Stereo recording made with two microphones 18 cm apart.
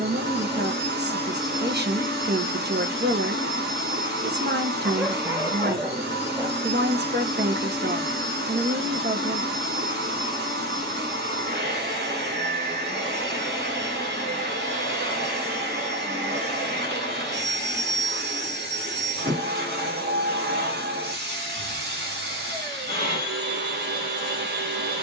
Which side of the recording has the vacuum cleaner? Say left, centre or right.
right.